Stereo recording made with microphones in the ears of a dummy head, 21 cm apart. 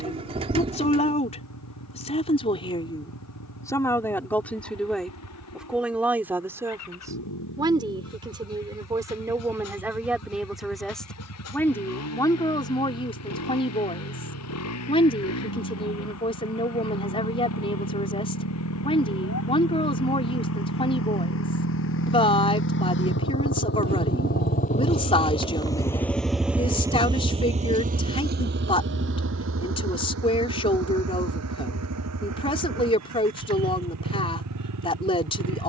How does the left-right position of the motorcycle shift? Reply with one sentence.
You can hear the motorcycle move from left to right.